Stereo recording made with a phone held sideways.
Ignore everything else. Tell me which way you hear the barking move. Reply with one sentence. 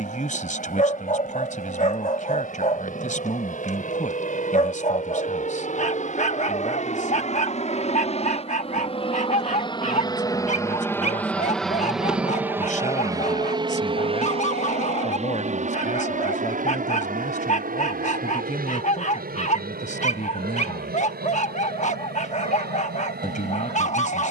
In this clip you hear the barking stay put.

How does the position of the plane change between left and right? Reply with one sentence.
In this clip you hear the plane move to the right.